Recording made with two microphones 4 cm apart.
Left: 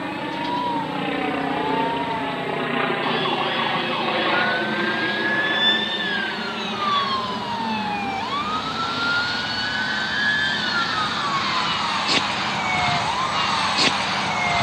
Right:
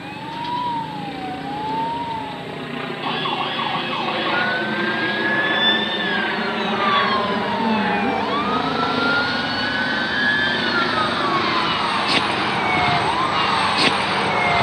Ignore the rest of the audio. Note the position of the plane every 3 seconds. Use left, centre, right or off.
left, centre, right, right, right.